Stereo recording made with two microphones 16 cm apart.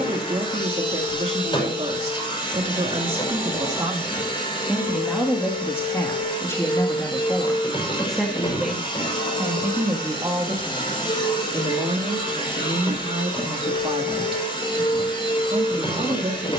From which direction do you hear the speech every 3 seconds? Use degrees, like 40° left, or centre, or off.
40° right, 10° right, 10° left, 20° right, 40° right, 40° right.